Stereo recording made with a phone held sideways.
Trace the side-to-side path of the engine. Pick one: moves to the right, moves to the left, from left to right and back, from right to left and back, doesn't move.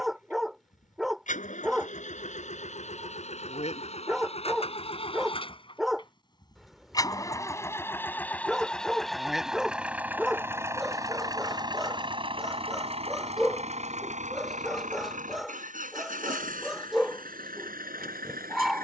moves to the right.